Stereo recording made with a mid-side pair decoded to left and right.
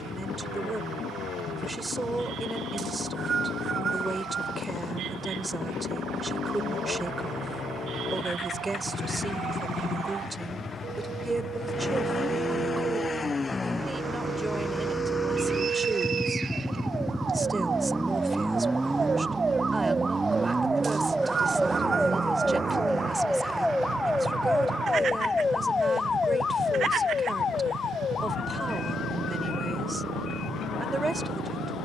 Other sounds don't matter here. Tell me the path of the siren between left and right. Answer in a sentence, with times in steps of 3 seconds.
In this clip you hear the siren on the right from 0 s, in the centre from 21 s and on the left from 24 s.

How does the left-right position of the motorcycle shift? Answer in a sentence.
In this clip you hear the motorcycle move to the right.